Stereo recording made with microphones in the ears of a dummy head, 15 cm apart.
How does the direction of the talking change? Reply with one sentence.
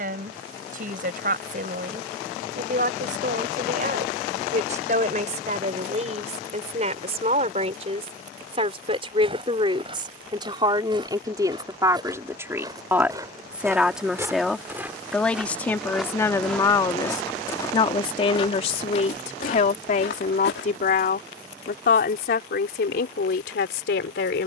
In this clip you hear the talking move from right to left.